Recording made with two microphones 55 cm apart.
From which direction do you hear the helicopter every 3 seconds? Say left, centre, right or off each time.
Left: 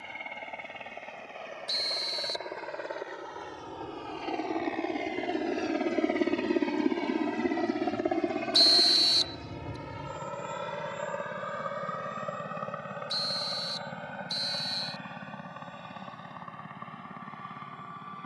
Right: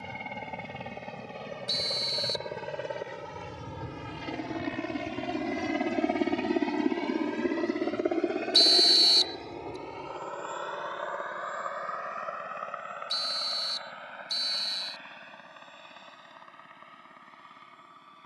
right, right, centre, left, left, left.